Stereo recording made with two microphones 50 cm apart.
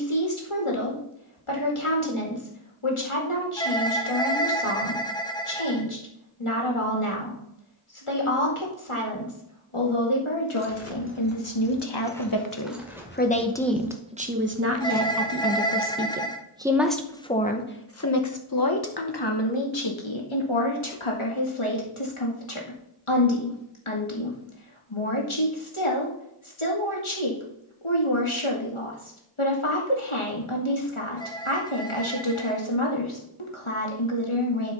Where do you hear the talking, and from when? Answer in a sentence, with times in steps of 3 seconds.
You can hear the talking on the left from 0 s, in the centre from 12 s and on the left from 18 s.